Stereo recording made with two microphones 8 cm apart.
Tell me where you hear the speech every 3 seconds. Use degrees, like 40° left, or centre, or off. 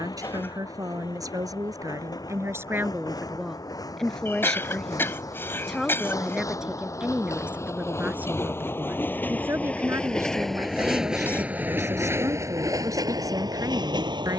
40° right, centre, 20° right, 40° right, 40° right.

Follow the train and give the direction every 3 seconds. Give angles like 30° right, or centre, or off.
60° left, 50° left, 40° left, centre, 50° right.